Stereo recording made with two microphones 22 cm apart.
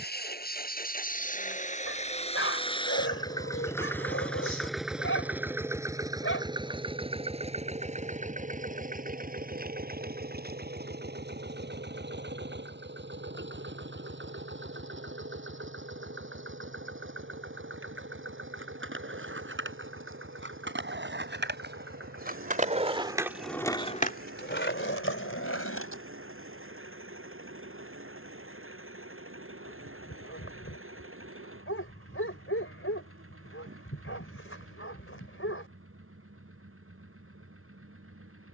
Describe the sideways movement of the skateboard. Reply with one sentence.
In this clip you hear the skateboard move from right to left.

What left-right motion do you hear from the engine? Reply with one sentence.
In this clip you hear the engine go from the left side to the right.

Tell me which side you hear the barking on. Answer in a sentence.
In this clip you hear the barking on the left.